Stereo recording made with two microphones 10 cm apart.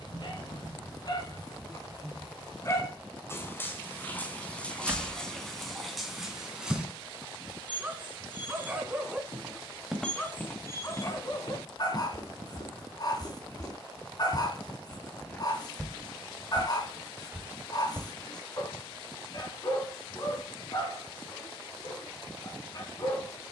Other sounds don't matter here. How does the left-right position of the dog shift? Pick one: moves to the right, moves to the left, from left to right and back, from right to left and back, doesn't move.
from left to right and back.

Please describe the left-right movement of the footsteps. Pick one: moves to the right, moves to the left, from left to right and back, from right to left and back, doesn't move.
from right to left and back.